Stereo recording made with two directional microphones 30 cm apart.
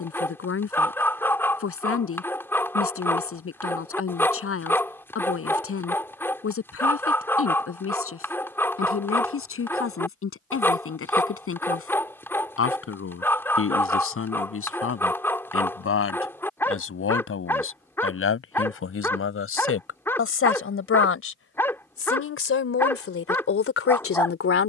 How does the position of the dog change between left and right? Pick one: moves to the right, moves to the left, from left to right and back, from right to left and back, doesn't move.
doesn't move.